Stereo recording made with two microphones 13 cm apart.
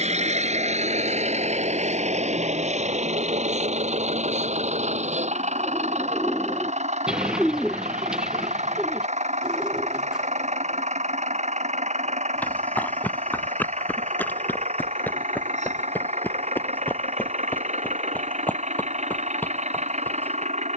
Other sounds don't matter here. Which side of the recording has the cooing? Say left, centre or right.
centre.